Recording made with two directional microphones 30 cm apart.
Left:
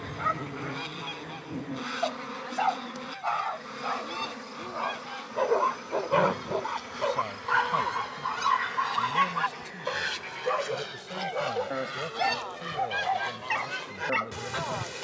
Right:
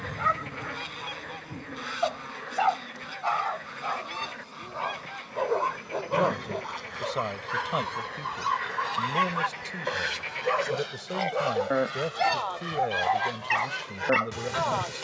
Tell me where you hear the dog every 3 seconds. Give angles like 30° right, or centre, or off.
20° right, centre, 30° left, 10° right, 20° right.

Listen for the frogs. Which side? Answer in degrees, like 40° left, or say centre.
50° right.